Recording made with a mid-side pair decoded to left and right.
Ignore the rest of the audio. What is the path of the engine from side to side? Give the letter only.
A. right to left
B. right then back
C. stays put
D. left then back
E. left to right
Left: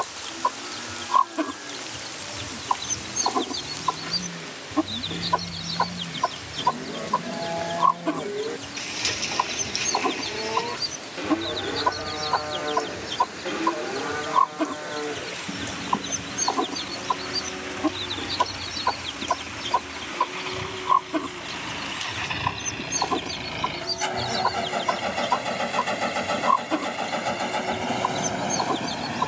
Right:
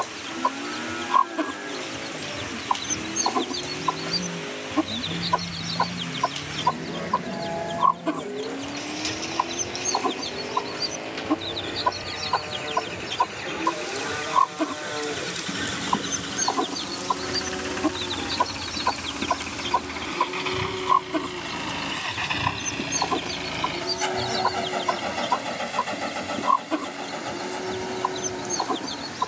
A.